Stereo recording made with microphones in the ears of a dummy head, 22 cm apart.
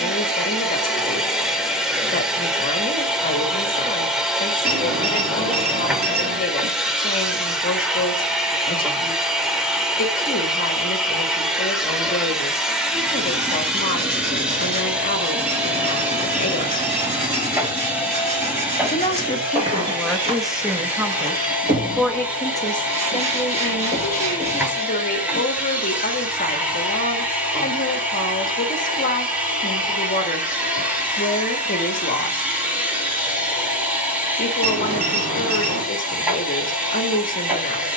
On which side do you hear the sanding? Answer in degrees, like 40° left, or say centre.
30° right.